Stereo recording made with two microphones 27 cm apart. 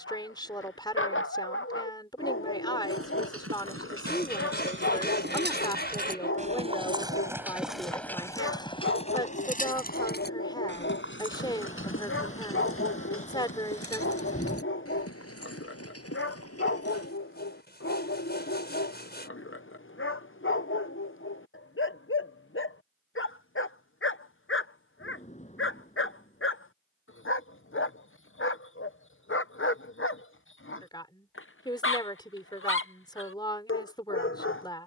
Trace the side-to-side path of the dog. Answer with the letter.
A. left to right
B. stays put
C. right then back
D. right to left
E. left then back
B.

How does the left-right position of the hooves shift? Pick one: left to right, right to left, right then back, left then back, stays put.
right to left.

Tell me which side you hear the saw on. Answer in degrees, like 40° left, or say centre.
40° left.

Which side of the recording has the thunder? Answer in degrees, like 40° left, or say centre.
30° left.